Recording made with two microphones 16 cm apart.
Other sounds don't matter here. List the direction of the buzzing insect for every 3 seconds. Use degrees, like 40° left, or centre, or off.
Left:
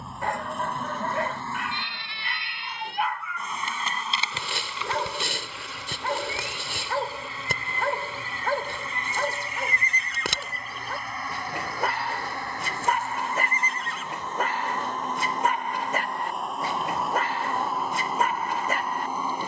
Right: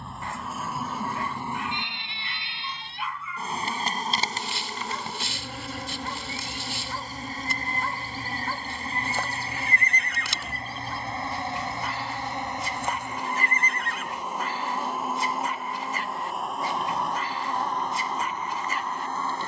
10° right, 40° right, 40° right, 30° right, 20° right, centre, 10° left.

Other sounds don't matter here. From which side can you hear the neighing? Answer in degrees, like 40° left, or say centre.
60° right.